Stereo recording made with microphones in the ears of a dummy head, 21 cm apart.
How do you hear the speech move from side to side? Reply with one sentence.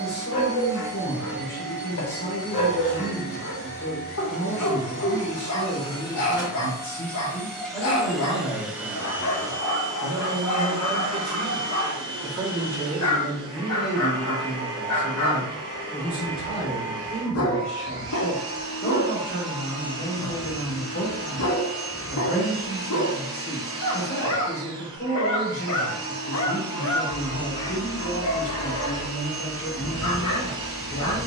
In this clip you hear the speech move from left to right and back again.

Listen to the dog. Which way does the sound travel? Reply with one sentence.
You can hear the dog stay put.